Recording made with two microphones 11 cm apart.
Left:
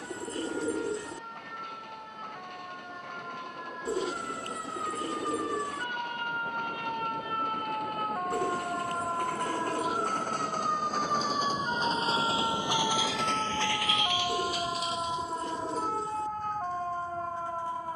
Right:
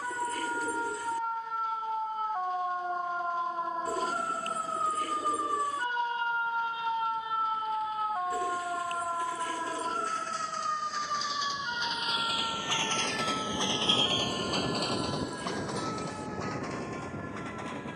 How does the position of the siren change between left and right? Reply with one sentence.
You can hear the siren go from the right side to the left.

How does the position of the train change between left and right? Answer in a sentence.
You can hear the train travel towards the right.